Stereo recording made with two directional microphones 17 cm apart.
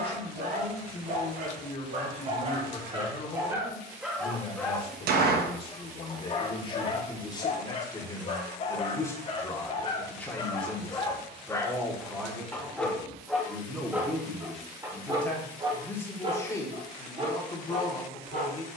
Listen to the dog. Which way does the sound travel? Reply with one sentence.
In this clip you hear the dog move from right to left and back again.